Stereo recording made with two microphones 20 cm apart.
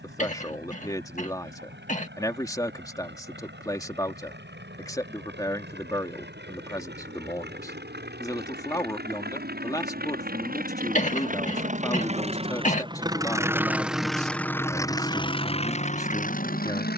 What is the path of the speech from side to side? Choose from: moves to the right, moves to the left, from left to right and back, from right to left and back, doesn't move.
doesn't move.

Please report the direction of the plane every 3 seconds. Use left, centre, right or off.
right, right, right, right, centre, left.